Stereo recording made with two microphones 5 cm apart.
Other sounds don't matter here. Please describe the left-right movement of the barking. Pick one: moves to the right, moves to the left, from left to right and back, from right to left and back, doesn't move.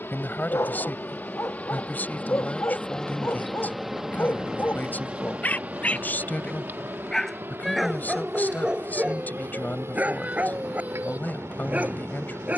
moves to the right.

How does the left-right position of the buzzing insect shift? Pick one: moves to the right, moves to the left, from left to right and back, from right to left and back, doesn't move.
moves to the right.